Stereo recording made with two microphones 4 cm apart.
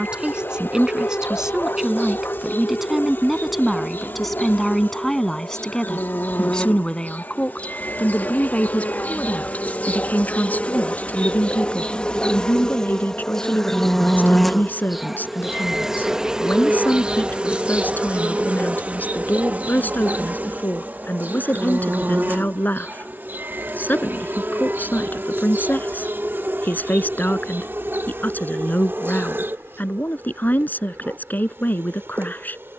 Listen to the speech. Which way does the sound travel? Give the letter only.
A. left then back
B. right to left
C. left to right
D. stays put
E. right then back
B.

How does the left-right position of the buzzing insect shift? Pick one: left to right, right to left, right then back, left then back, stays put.
left to right.